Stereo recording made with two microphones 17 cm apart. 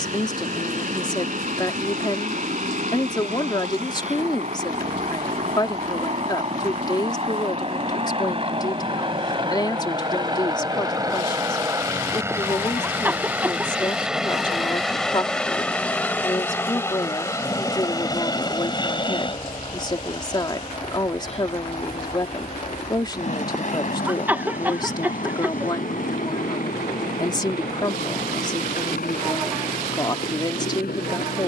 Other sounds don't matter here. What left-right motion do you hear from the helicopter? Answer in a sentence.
In this clip you hear the helicopter move from right to left.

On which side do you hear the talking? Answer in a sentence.
In this clip you hear the talking on the left.